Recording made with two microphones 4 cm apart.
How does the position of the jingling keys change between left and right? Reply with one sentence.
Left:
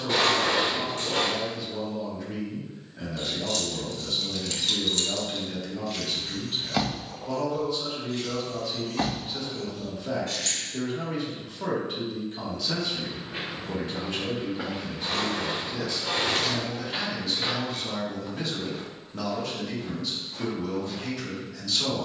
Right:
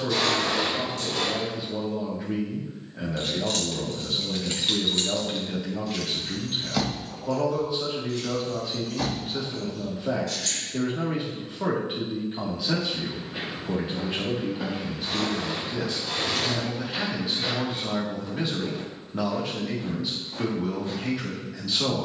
You can hear the jingling keys go from the right side to the left.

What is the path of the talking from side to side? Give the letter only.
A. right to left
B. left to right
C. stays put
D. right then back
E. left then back
C.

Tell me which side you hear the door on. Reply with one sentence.
In this clip you hear the door on the left.